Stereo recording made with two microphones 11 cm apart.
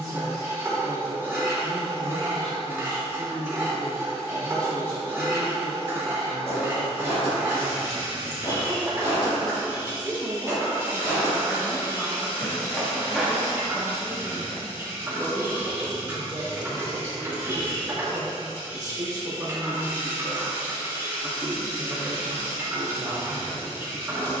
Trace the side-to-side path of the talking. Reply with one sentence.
You can hear the talking move from right to left and back again.